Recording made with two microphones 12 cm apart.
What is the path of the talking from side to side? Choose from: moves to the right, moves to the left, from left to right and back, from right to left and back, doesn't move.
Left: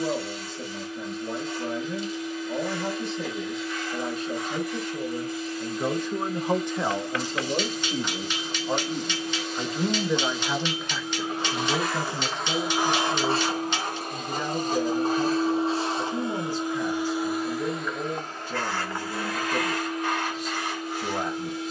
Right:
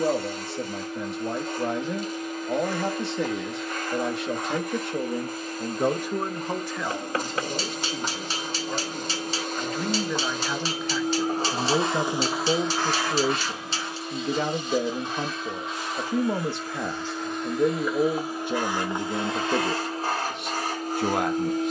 from right to left and back.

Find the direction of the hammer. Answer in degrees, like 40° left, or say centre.
40° right.